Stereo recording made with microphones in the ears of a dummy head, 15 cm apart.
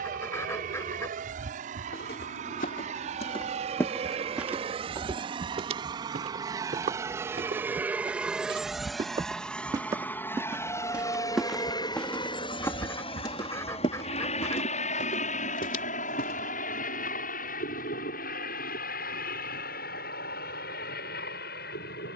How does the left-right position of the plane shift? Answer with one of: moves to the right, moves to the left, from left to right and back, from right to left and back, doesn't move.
moves to the left.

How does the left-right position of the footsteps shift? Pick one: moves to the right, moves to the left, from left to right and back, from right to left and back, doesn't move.
from left to right and back.